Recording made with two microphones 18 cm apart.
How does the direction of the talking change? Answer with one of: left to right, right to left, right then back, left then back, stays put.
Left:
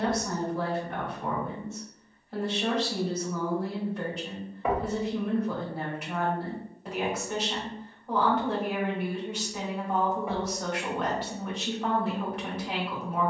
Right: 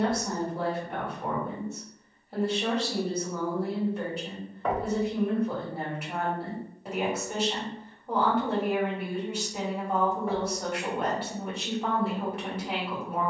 stays put.